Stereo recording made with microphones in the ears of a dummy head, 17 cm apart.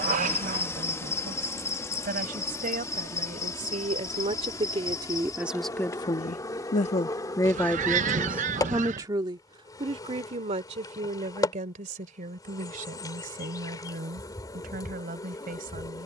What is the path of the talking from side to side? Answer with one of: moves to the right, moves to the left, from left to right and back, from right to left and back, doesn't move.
from right to left and back.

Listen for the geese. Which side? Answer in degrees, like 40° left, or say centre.
40° right.